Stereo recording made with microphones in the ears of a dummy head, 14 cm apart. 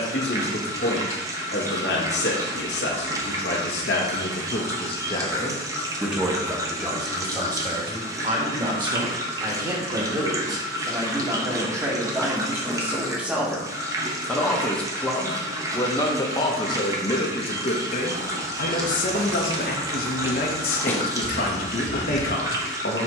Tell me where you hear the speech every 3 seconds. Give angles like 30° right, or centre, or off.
70° left, 40° left, 20° right, 20° right, centre, 30° left, 60° left, 60° left.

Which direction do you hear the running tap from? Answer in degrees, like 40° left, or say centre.
20° right.